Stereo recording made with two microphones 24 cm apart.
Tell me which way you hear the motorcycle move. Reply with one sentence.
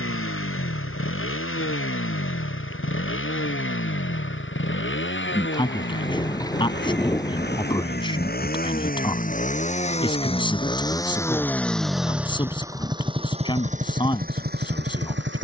In this clip you hear the motorcycle go from the left side to the right.